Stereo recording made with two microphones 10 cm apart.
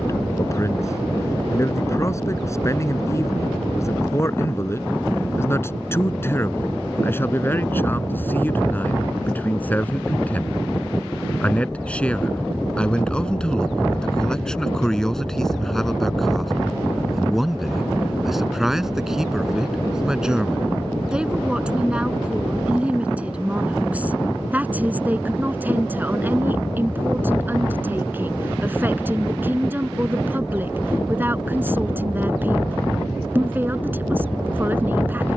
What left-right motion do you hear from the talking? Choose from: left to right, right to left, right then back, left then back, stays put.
left to right.